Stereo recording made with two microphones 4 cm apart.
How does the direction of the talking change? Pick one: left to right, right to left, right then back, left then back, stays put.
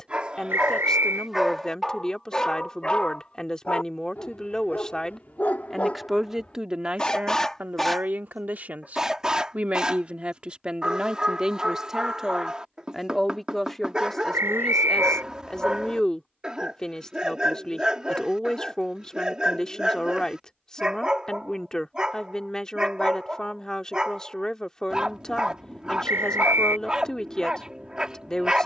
right then back.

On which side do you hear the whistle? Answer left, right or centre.
right.